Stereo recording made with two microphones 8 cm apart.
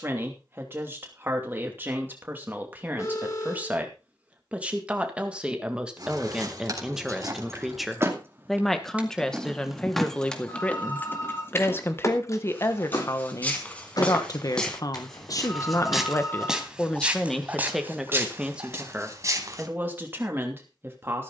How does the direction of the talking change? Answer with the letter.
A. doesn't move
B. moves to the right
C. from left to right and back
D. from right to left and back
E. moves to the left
D.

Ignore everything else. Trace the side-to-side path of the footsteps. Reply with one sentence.
In this clip you hear the footsteps travel towards the right.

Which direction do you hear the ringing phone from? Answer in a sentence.
In this clip you hear the ringing phone on the left.